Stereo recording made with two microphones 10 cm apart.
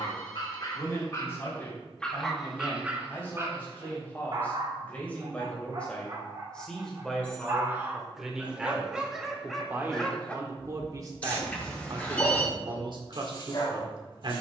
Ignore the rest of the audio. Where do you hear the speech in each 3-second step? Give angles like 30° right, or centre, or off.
20° left, 20° left, centre, 30° right, 50° right.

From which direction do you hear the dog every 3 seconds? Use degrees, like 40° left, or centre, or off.
20° left, 40° right, 20° right, 10° left, 40° left.